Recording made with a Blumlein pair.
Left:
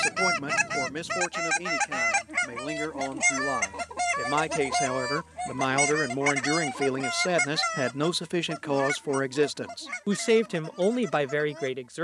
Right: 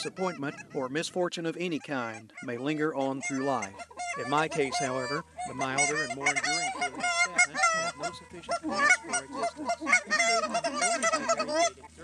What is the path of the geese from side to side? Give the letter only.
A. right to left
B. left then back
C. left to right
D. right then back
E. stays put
C.